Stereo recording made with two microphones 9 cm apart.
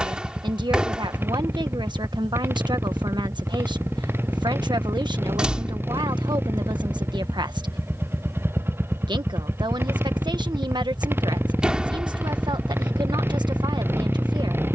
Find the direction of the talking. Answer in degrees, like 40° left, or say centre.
50° right.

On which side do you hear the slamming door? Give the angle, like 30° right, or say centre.
10° right.